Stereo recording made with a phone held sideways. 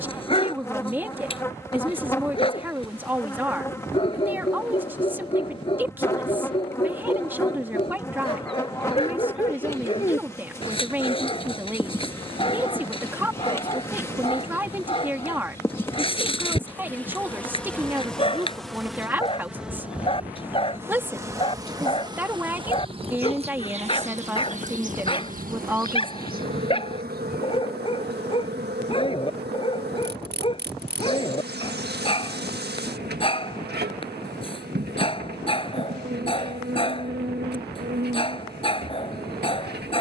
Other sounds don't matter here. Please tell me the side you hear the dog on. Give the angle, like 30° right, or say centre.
30° left.